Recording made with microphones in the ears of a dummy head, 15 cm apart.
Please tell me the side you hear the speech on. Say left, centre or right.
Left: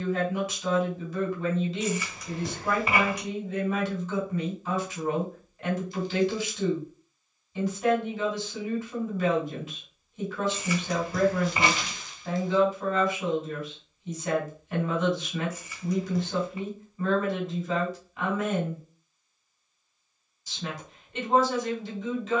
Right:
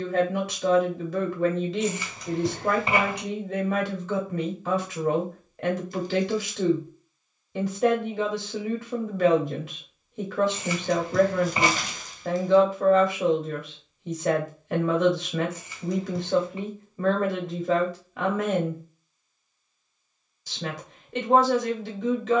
right.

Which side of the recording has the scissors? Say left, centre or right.
right.